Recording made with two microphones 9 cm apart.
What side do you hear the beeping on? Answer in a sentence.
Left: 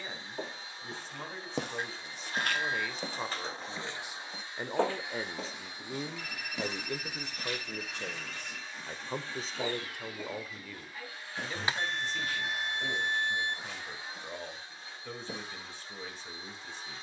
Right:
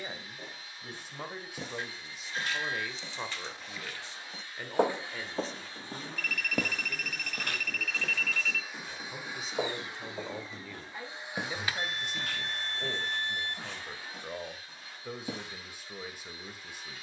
You can hear the beeping on the left.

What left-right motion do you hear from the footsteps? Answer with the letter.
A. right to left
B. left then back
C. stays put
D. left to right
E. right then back
D.